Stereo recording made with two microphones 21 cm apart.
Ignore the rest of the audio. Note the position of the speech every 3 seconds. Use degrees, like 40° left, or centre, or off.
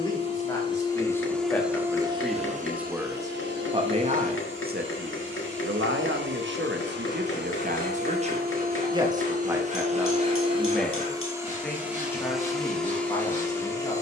10° left, 40° right, 50° right, centre, 20° left.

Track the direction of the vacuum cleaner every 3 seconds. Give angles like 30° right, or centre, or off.
centre, 60° right, 50° right, 20° right, 10° left.